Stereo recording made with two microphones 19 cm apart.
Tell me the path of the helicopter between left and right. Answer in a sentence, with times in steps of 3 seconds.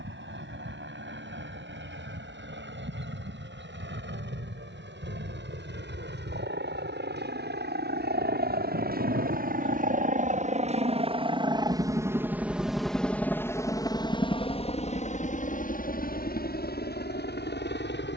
You can hear the helicopter on the right from 0 s, in the centre from 12 s and on the left from 15 s.